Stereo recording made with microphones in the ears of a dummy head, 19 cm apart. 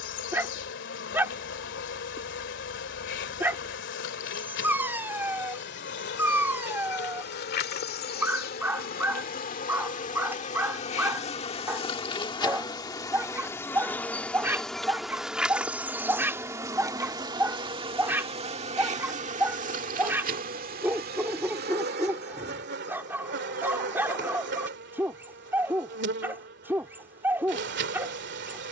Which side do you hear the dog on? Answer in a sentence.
You can hear the dog in the centre.